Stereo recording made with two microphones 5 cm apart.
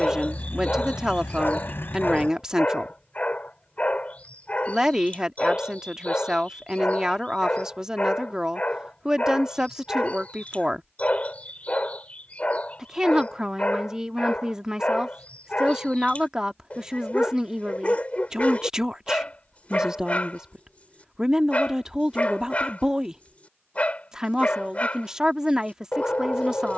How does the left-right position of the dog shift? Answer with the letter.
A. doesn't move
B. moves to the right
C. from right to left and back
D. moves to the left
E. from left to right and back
A.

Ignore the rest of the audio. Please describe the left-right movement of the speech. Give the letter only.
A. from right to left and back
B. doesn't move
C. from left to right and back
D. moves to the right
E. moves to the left
B.